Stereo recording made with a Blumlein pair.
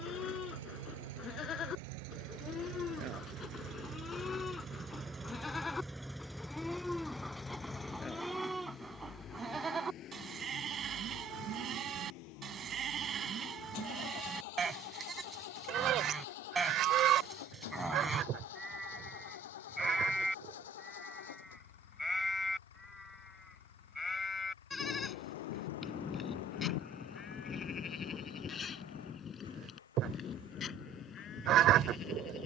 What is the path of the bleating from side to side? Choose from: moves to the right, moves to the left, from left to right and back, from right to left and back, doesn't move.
from left to right and back.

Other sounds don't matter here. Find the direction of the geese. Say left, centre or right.
right.